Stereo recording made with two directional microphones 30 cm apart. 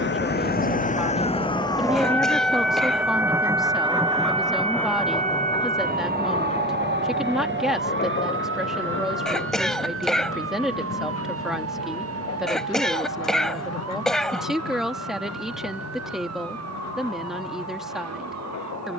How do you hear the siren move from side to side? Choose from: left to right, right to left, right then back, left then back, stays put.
left to right.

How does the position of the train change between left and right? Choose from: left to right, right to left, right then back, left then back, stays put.
right to left.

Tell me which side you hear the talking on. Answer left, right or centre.
centre.